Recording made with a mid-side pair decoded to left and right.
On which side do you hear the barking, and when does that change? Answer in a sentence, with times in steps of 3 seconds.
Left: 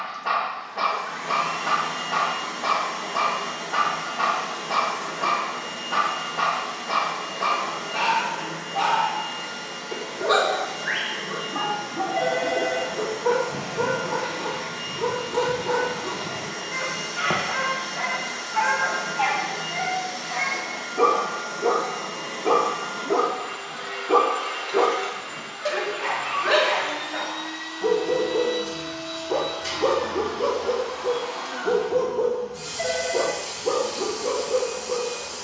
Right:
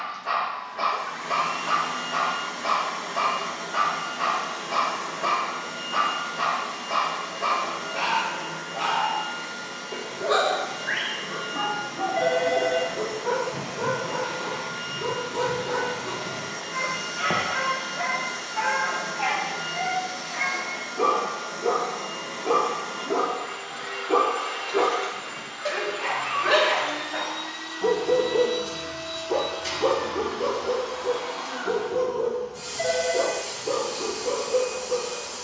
In this clip you hear the barking on the left from 0 s, in the centre from 24 s and on the left from 30 s.